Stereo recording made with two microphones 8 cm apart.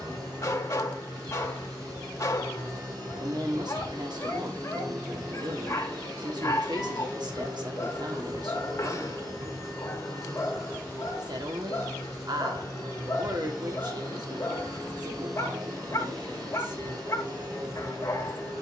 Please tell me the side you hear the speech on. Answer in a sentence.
In this clip you hear the speech on the right.